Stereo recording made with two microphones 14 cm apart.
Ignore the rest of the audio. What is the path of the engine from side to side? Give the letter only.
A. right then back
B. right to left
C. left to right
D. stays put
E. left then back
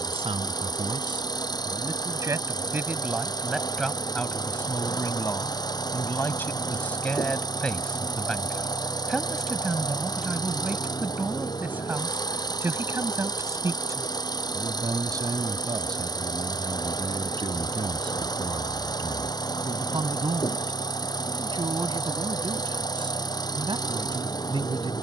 D.